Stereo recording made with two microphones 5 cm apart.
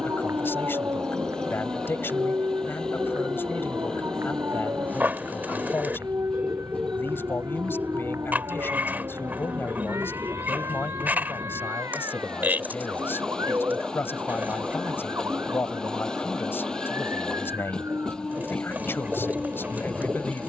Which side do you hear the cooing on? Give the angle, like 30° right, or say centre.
40° right.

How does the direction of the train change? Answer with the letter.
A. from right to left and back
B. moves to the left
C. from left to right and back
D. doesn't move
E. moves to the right
D.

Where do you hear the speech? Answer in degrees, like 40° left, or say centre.
50° left.